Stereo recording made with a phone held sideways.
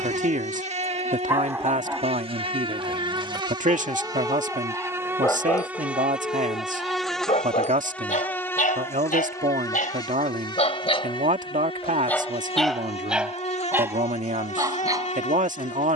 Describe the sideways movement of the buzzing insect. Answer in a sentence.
In this clip you hear the buzzing insect go from the right side to the left.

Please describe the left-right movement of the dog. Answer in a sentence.
In this clip you hear the dog go left and come back.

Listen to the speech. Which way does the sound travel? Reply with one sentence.
You can hear the speech stay put.